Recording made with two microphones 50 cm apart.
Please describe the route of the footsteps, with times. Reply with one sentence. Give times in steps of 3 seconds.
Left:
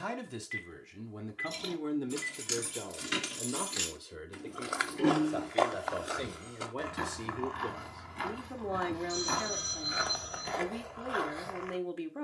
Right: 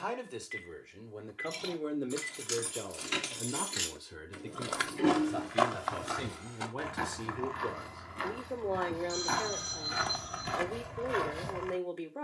You can hear the footsteps not at all from 0 s, on the right from 3 s, in the centre from 6 s and on the right from 9 s.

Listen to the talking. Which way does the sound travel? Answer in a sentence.
You can hear the talking move from left to right and back again.